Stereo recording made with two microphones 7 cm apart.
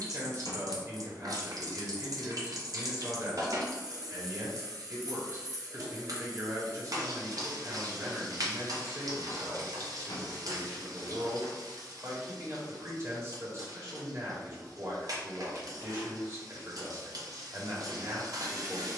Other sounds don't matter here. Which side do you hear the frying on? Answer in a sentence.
In this clip you hear the frying on the right.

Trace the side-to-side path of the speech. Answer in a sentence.
You can hear the speech stay in one place.